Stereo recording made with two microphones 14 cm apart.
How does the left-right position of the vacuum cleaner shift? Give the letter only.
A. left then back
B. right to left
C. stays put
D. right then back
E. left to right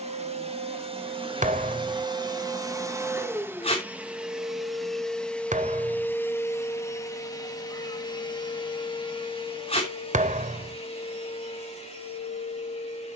B.